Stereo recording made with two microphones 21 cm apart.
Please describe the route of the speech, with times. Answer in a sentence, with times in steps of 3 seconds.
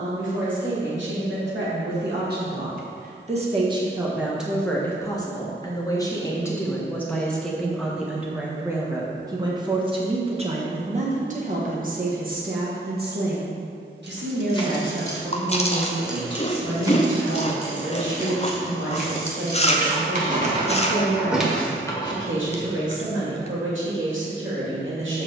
In this clip you hear the speech on the right from 0 s, in the centre from 3 s and on the right from 9 s.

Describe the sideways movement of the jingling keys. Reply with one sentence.
You can hear the jingling keys move from left to right and back again.